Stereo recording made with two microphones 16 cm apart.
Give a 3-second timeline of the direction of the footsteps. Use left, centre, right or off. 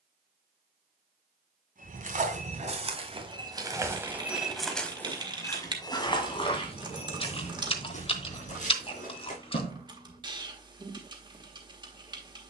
right, centre, left, left.